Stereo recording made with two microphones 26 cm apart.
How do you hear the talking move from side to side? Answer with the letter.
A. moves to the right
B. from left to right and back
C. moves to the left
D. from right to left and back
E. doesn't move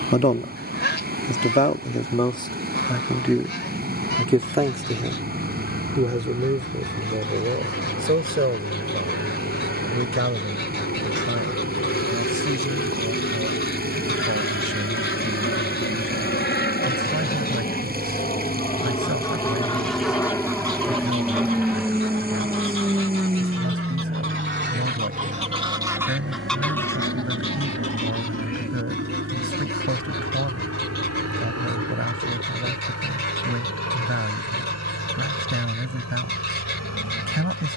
A.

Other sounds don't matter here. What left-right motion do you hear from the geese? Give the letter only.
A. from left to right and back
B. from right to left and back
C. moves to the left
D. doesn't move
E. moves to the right
A.